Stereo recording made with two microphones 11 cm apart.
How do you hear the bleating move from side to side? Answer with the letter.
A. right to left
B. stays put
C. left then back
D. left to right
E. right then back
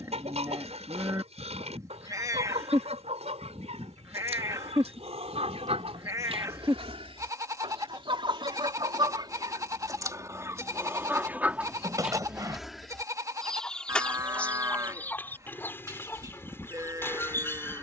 B.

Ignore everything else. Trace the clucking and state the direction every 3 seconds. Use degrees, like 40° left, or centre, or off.
80° right, 80° right, 60° right, 30° right, 10° left, 20° left.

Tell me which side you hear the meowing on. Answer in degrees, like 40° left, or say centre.
30° right.